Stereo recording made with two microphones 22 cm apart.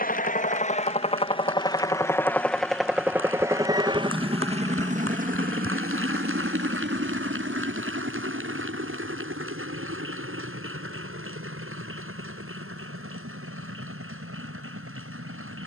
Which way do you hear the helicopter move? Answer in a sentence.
You can hear the helicopter move to the right.